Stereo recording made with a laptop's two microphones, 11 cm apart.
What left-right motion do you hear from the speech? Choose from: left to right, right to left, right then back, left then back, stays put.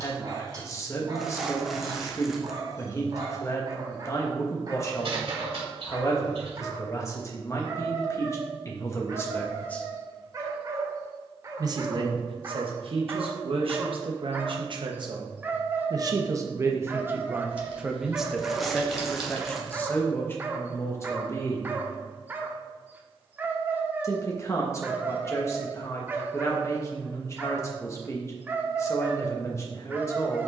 right then back.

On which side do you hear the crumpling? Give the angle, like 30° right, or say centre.
centre.